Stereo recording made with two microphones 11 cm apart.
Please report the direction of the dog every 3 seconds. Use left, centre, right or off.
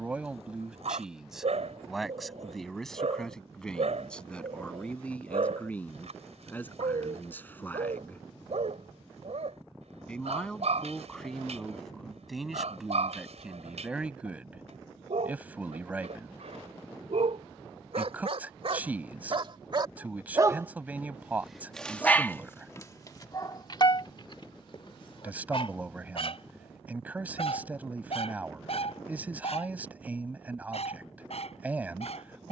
right, right, right, right, right, right, right, left, left, left, left.